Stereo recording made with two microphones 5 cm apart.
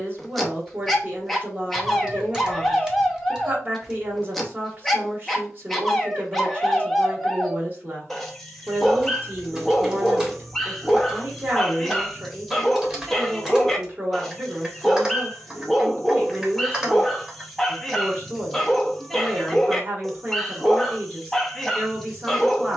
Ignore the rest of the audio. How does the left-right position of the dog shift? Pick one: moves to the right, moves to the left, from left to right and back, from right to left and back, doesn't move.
doesn't move.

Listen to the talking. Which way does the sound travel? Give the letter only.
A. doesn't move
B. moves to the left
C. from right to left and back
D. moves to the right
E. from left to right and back
A.